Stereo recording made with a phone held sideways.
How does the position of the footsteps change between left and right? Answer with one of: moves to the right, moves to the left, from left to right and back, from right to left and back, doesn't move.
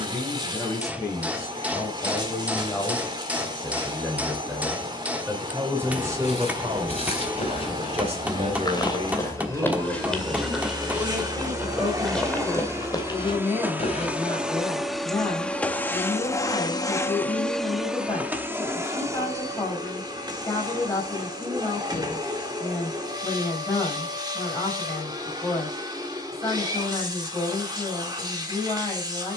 from left to right and back.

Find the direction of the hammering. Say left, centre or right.
centre.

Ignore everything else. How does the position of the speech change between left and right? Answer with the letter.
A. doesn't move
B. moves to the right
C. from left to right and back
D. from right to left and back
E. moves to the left
C.